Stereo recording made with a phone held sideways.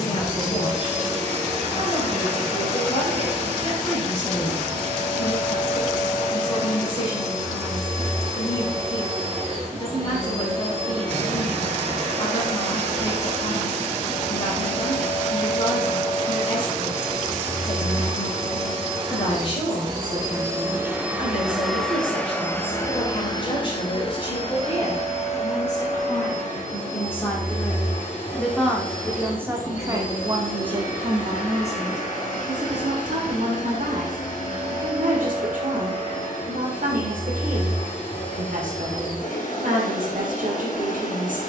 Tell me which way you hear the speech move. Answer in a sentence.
In this clip you hear the speech go from the left side to the right.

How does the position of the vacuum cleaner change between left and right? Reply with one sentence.
In this clip you hear the vacuum cleaner move to the left.